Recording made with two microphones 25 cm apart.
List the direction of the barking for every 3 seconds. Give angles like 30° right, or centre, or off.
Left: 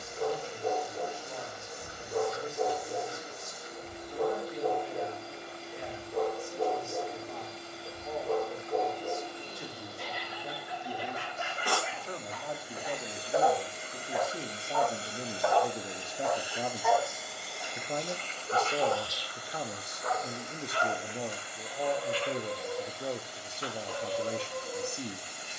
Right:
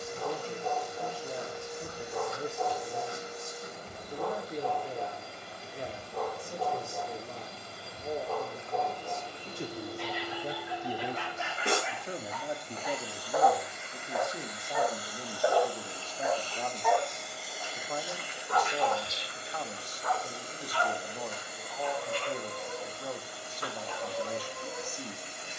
50° left, 50° left, 50° left, 40° left, 20° left, 10° right, 30° left, 40° left, 40° left.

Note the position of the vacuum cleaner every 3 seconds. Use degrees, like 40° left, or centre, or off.
70° right, 70° right, 70° right, 50° right, 20° left, 10° left, 30° right, 50° right, 60° right.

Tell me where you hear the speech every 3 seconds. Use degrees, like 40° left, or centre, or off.
40° right, 40° right, 40° right, 30° right, centre, 20° left, 30° left, 30° left, 30° left.